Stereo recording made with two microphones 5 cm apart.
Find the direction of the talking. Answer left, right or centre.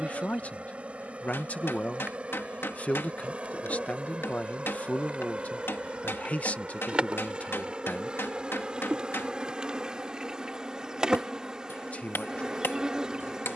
left.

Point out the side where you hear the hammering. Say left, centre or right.
left.